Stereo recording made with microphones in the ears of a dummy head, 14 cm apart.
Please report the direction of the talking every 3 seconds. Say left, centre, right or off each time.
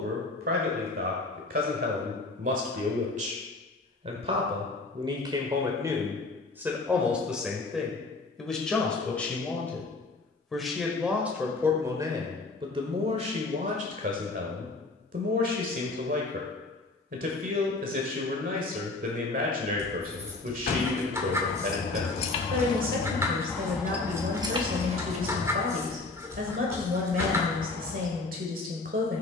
right, right, centre, centre, right, right, right, right, right, right.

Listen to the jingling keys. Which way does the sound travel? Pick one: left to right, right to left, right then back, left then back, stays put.
left to right.